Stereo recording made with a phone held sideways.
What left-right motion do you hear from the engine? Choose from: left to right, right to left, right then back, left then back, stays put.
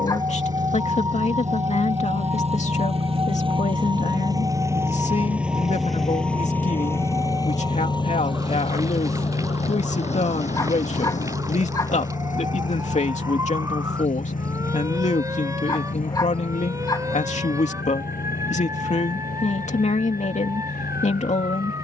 right to left.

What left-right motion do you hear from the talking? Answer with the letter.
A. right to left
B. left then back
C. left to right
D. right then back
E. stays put
E.